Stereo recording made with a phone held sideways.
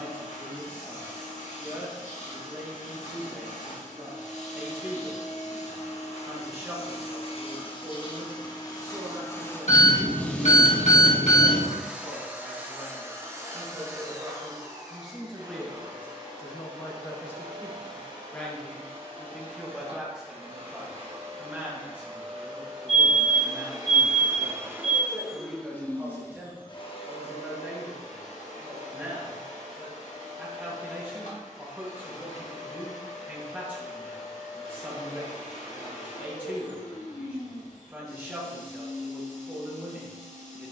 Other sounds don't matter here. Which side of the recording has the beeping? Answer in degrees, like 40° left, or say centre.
60° left.